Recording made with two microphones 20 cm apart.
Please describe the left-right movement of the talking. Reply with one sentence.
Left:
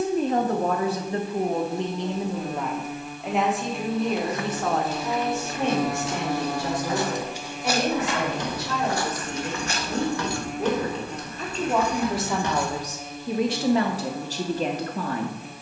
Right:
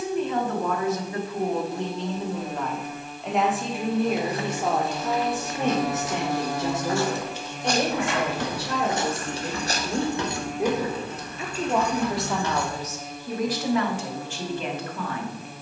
In this clip you hear the talking move from left to right and back again.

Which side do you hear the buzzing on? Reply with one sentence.
In this clip you hear the buzzing in the centre.